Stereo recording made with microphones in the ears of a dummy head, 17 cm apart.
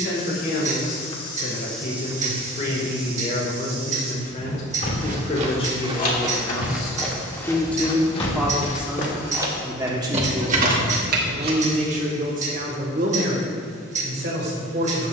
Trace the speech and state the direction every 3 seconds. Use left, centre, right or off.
left, left, centre, right, right.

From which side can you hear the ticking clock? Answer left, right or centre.
right.